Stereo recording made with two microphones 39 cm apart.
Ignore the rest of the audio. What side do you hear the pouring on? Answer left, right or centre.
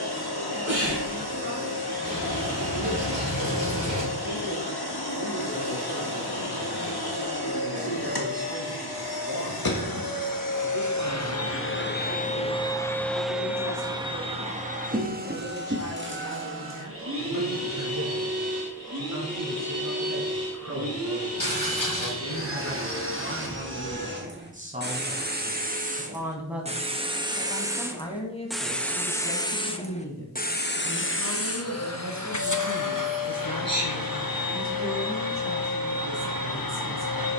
left.